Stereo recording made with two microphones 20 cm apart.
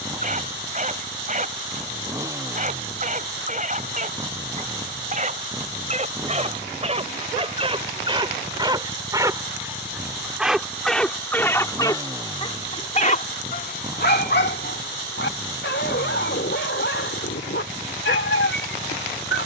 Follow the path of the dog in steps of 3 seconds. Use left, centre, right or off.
right, right, right, centre, left, left, left.